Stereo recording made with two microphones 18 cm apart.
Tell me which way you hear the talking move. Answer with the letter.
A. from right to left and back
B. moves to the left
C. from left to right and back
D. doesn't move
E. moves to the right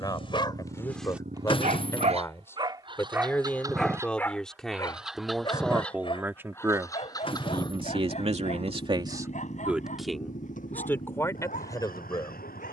C.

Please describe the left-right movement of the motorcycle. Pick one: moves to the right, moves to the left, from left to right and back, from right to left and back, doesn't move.
moves to the left.